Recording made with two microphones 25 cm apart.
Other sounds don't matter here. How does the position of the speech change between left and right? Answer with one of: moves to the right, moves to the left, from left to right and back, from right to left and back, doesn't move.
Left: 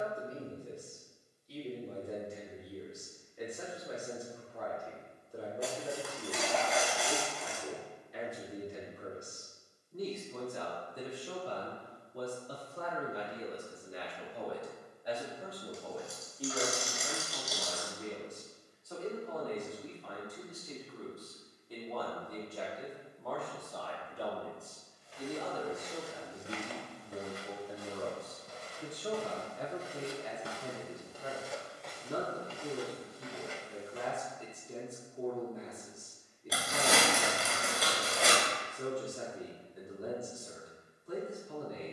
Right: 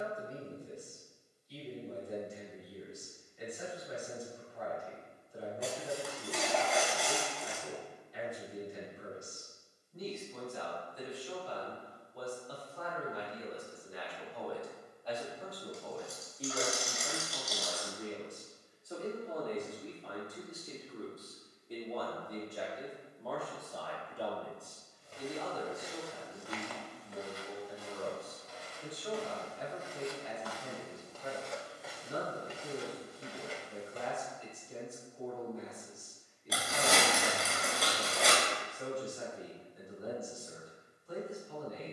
from left to right and back.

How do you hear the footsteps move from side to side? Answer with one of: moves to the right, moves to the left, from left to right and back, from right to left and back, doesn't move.
from right to left and back.